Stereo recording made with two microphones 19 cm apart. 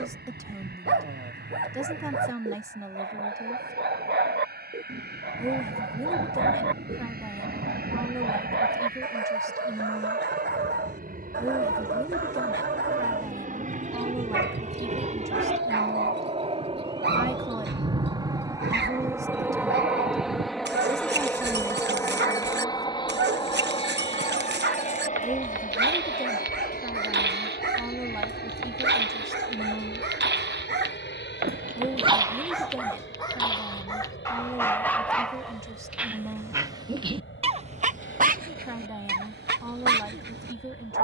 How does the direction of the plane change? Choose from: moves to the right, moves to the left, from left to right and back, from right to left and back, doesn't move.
moves to the left.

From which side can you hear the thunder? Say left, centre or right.
right.